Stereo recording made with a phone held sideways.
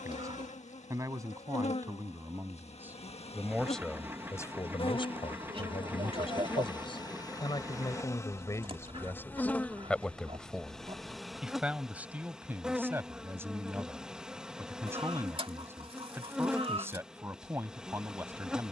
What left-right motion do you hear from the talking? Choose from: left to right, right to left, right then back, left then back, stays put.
left then back.